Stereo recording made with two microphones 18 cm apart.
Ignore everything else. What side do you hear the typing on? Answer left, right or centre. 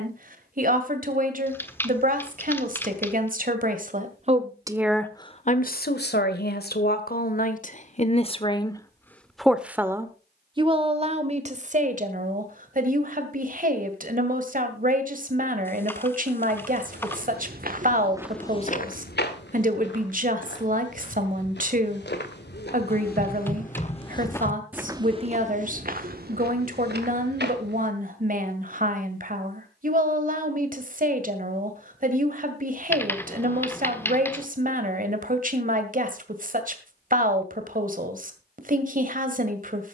centre.